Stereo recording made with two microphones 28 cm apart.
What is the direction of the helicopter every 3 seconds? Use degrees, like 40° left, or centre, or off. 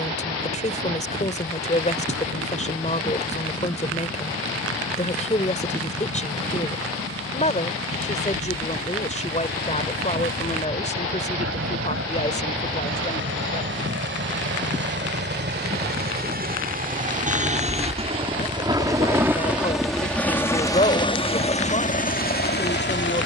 70° right, 60° right, 60° right, 60° right, 50° right, 40° right, centre, 30° left.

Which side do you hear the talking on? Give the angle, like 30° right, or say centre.
30° left.